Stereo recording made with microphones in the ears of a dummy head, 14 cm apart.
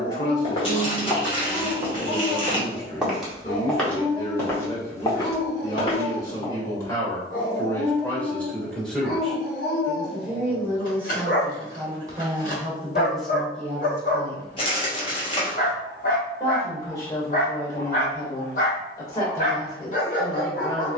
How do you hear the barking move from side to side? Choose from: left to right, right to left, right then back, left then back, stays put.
stays put.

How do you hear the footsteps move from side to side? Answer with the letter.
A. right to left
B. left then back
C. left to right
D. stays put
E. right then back
E.